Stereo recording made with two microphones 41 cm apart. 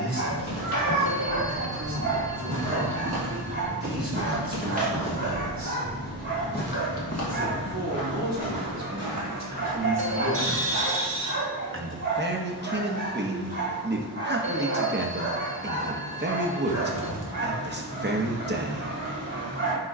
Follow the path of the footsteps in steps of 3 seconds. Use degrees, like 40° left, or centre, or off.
50° right, 20° right, 40° left, 70° left, off, off, off.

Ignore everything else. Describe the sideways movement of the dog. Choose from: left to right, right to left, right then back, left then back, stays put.
stays put.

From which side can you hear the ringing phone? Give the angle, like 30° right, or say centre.
60° right.